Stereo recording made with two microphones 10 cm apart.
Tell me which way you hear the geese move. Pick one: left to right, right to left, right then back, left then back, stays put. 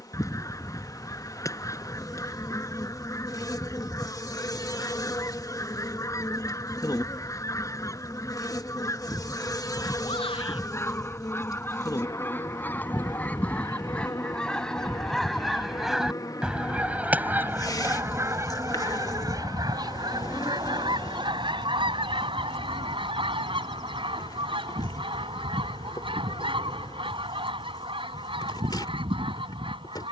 left to right.